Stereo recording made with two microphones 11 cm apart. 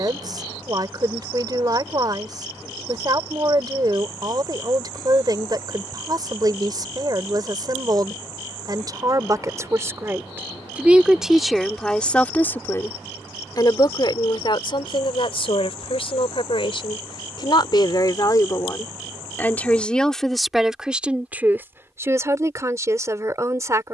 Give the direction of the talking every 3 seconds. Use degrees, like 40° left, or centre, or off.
40° right, 40° right, 40° right, 20° right, 30° left, 50° left, 10° left, 20° right.